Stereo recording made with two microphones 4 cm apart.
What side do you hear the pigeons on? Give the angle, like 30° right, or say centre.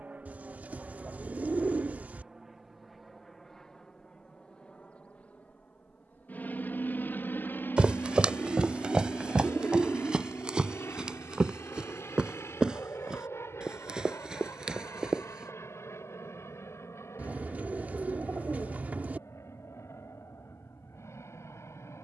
40° right.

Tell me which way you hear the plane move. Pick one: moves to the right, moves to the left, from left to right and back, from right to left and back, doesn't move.
moves to the left.